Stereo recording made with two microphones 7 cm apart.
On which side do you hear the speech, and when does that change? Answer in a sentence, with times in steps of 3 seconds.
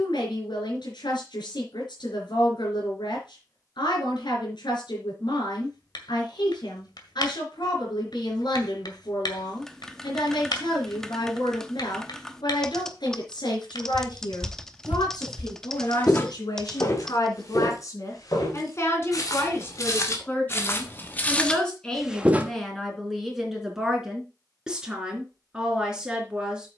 In this clip you hear the speech on the left from 0 s and in the centre from 21 s.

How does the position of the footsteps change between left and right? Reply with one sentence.
You can hear the footsteps move from right to left and back again.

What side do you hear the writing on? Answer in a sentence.
You can hear the writing on the left.